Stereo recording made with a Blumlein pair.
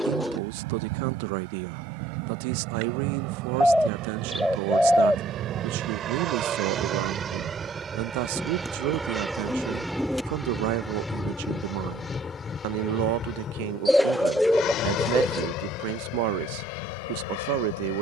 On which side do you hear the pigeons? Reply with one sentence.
In this clip you hear the pigeons in the centre.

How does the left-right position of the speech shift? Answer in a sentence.
You can hear the speech stay in one place.